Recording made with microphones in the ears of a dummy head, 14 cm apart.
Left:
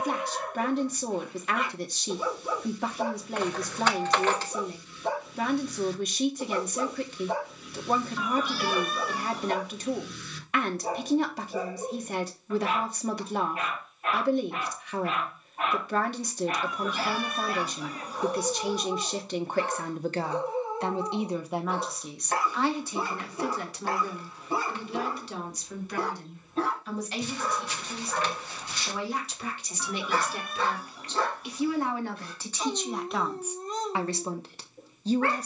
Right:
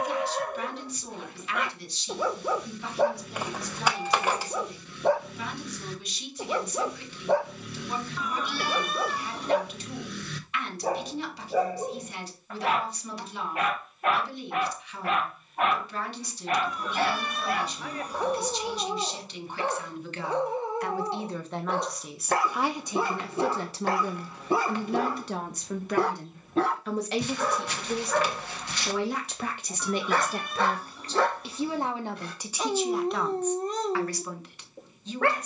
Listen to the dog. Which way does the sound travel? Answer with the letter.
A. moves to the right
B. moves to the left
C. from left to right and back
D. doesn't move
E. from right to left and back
D.